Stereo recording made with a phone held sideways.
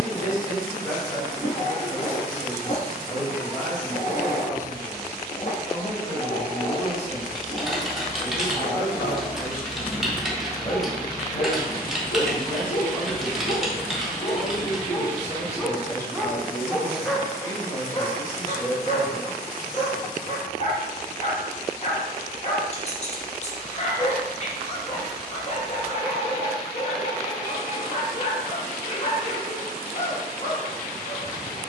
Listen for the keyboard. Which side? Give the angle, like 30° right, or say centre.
centre.